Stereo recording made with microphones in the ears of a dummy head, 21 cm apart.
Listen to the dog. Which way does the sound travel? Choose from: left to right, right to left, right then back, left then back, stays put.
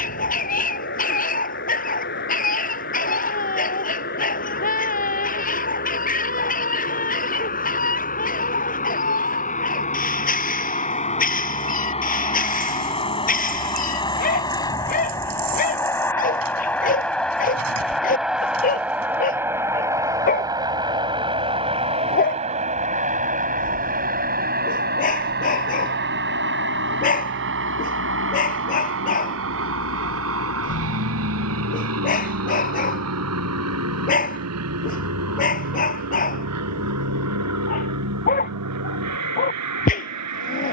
stays put.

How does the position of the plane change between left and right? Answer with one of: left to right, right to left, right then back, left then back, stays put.
left to right.